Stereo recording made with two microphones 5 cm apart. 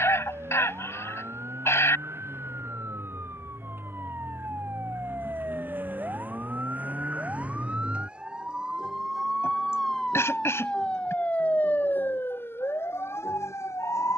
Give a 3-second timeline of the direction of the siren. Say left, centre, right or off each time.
right, right, right, centre, left.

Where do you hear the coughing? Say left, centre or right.
left.